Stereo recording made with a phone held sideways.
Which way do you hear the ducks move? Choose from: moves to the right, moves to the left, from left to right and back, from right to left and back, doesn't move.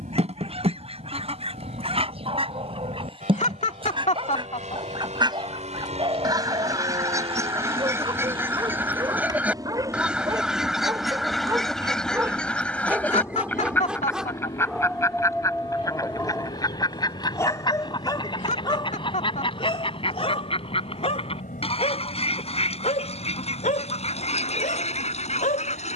moves to the left.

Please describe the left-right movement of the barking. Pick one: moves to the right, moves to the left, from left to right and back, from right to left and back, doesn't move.
moves to the left.